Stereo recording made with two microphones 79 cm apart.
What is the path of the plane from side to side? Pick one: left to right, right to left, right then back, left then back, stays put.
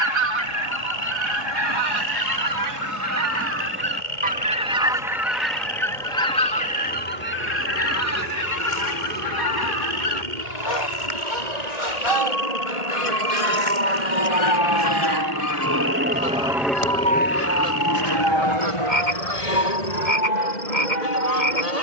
right to left.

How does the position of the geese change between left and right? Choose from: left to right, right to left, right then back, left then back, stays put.
right to left.